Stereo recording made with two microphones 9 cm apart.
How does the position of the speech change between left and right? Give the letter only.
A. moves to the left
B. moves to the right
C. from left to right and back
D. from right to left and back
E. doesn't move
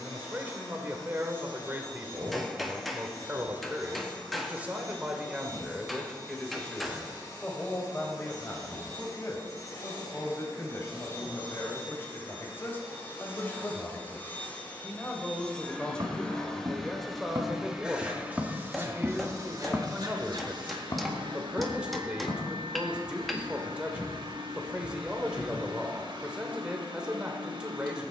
D.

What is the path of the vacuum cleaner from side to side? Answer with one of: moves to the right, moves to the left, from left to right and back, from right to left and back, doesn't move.
moves to the right.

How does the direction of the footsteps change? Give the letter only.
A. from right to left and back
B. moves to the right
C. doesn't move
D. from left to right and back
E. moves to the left
E.